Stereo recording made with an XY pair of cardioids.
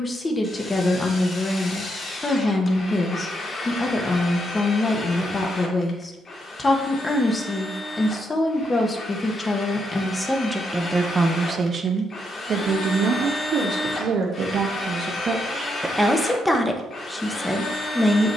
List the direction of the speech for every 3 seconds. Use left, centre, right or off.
left, left, left, centre, right, centre.